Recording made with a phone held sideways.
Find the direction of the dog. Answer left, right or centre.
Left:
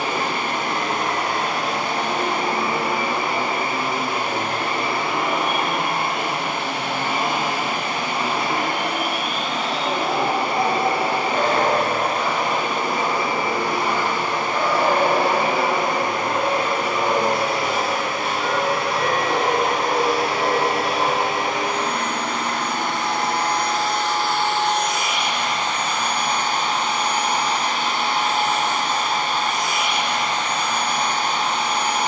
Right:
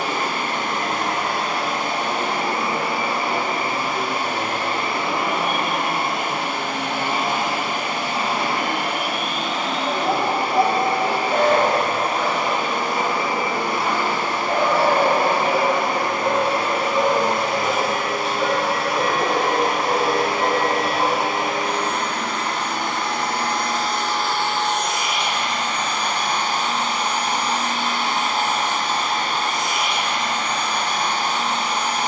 right.